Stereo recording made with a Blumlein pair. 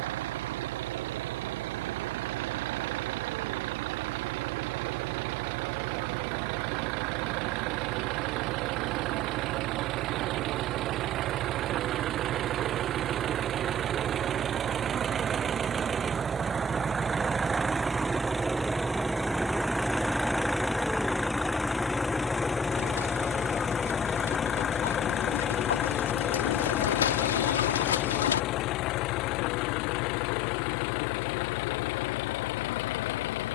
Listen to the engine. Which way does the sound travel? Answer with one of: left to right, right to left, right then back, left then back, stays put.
right to left.